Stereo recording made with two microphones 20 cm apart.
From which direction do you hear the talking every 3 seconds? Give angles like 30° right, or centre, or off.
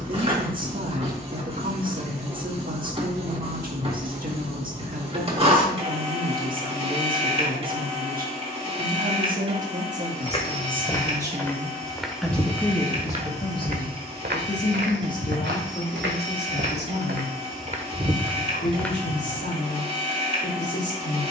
50° right, 50° right, 50° right, 30° right, 20° left, 50° left, 60° left.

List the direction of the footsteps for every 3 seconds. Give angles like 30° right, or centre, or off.
off, off, off, 20° left, 40° right, 60° right, centre.